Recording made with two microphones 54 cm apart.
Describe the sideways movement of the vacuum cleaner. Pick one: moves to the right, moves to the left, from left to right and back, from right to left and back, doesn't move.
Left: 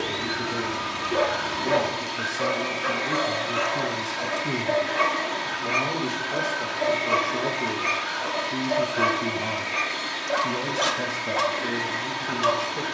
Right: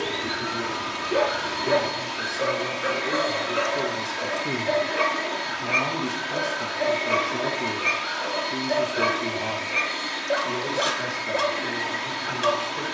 doesn't move.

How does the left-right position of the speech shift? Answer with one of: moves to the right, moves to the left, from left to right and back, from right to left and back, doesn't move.
from left to right and back.